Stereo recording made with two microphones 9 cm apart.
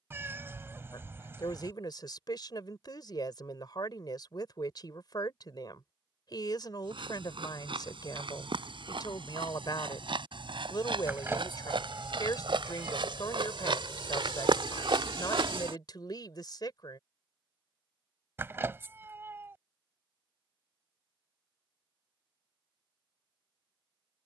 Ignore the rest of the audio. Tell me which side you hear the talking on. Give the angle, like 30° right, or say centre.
50° left.